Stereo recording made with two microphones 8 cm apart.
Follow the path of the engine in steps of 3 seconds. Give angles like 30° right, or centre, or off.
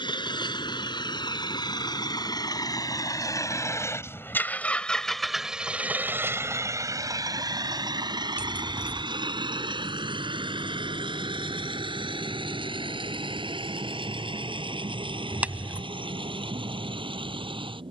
60° left, 20° left, 50° right, 70° right, 80° right, 80° right.